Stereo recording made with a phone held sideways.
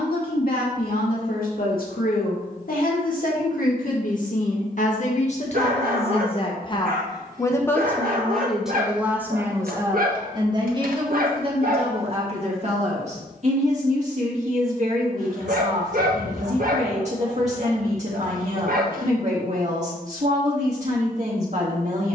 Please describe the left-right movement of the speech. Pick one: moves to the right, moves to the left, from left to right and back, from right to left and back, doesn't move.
moves to the right.